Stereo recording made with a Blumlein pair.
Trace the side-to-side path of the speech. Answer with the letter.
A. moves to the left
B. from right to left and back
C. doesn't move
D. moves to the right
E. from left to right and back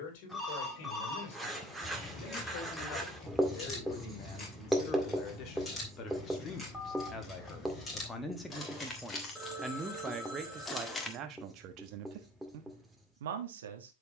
D.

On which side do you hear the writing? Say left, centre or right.
centre.